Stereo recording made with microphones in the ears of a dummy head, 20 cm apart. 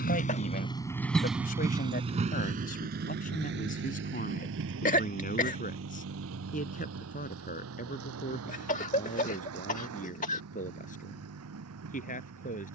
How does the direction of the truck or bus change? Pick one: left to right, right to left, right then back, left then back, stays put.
left to right.